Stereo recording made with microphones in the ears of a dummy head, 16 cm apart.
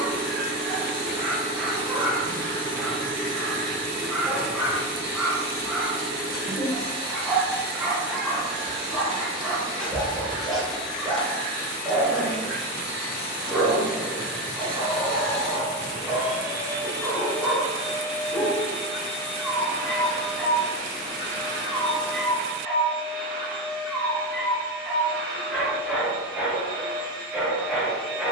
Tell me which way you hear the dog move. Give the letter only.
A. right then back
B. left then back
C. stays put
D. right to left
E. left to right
C.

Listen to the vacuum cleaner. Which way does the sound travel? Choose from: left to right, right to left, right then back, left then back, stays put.
left then back.